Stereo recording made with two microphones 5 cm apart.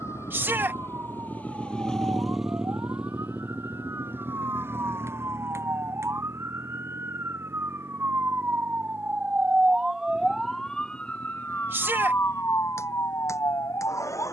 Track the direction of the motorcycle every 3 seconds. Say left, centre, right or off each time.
left, right, right, right, right.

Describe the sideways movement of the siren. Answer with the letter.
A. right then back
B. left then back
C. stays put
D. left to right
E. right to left
E.